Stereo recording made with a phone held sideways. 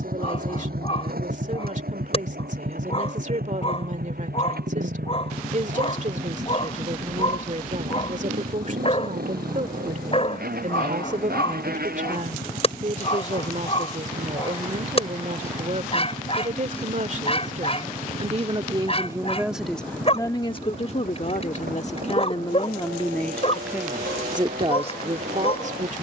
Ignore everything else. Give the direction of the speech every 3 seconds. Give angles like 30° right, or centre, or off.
50° right, 50° right, 50° right, 50° right, 50° right, 50° right, centre, 30° left, 40° right.